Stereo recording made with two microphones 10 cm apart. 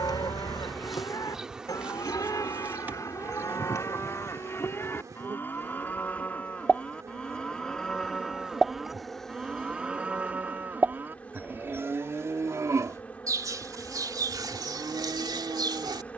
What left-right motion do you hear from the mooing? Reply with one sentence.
In this clip you hear the mooing move to the right.